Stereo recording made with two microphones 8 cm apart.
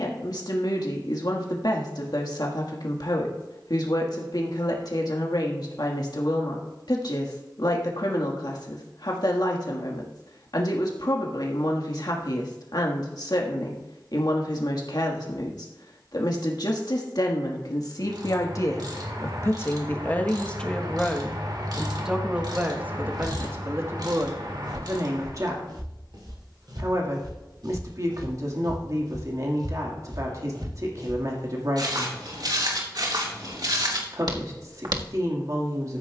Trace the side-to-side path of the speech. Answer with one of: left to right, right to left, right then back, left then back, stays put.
left to right.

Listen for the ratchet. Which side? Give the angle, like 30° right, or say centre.
60° right.